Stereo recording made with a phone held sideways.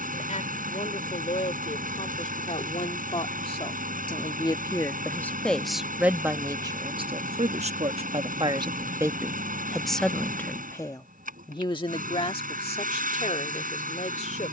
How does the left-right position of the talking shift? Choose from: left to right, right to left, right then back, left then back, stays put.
right then back.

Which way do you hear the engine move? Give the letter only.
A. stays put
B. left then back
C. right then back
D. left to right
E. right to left
A.